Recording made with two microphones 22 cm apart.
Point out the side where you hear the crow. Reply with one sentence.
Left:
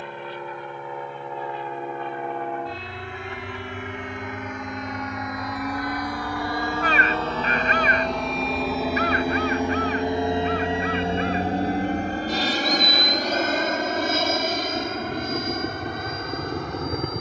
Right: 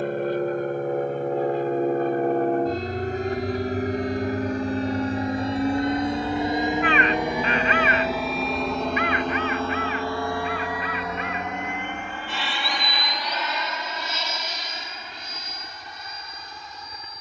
In this clip you hear the crow on the left.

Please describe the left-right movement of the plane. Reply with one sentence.
You can hear the plane move from right to left.